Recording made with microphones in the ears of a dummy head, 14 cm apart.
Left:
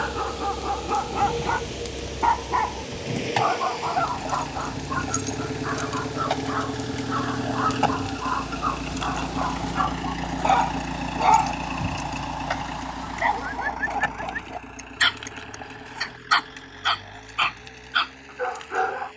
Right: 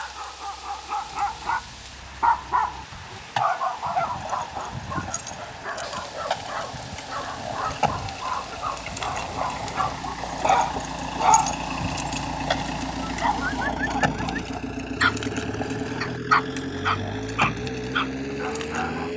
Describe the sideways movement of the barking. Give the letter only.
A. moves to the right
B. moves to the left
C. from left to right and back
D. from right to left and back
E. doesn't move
C.